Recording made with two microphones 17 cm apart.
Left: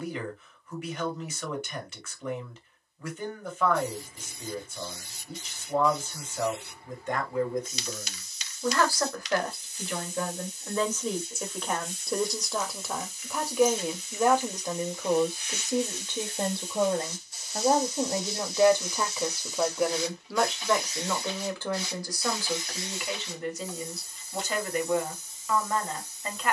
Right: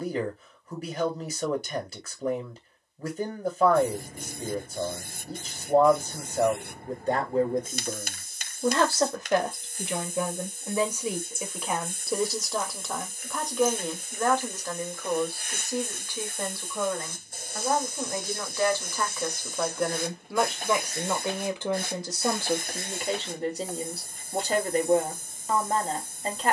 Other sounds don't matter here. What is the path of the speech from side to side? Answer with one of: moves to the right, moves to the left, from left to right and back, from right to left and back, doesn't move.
from right to left and back.